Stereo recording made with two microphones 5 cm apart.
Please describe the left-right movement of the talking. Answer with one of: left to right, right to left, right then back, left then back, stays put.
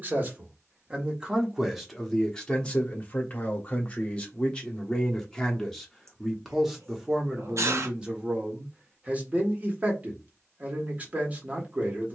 left then back.